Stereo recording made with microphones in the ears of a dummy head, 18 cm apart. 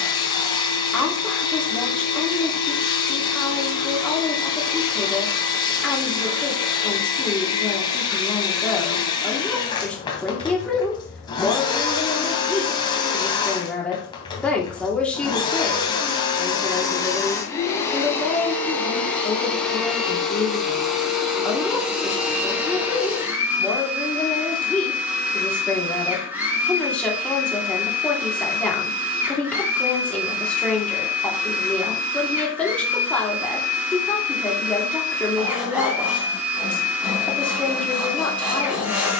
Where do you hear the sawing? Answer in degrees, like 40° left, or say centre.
10° right.